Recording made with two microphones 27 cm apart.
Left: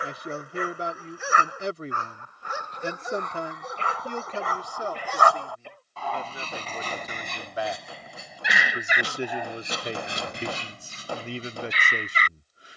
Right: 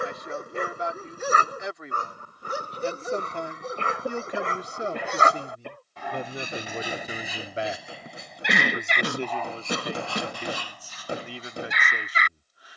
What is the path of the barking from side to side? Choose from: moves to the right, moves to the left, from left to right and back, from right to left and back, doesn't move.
moves to the left.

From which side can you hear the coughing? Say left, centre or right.
right.